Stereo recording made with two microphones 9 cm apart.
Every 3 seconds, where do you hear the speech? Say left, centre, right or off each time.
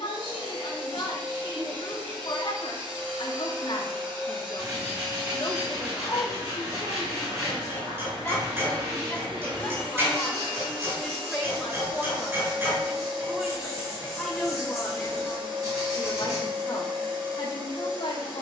left, left, left, centre, centre, left.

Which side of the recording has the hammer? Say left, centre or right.
right.